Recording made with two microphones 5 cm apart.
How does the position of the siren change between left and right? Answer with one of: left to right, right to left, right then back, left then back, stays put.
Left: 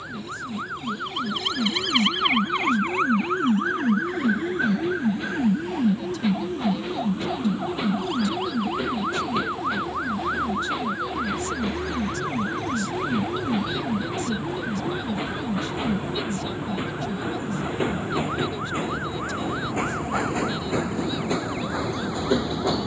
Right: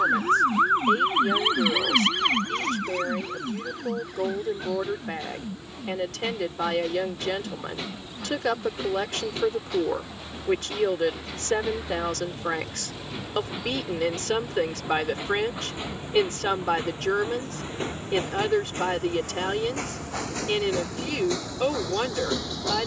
right to left.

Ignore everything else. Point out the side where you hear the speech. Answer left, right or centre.
right.